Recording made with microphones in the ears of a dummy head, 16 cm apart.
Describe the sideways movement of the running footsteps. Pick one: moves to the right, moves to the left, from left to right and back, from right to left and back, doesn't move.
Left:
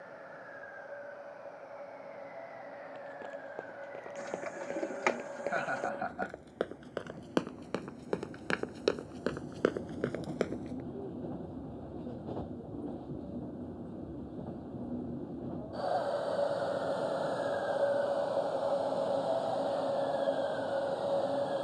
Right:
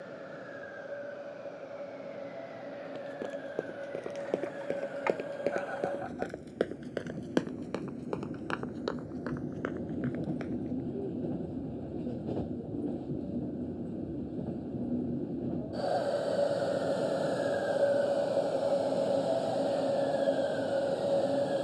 moves to the left.